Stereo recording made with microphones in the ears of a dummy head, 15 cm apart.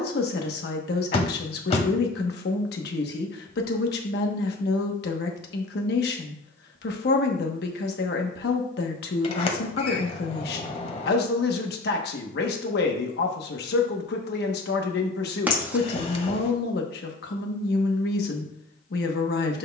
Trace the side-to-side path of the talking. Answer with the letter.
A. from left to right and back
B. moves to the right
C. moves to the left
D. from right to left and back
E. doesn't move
E.